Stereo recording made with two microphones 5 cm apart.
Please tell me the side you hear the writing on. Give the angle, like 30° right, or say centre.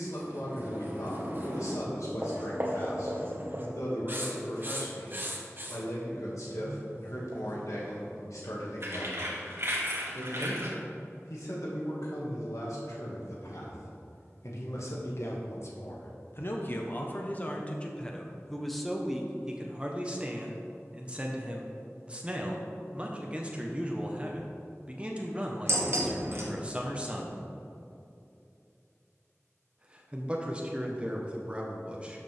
40° right.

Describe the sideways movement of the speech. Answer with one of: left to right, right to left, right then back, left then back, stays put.
left to right.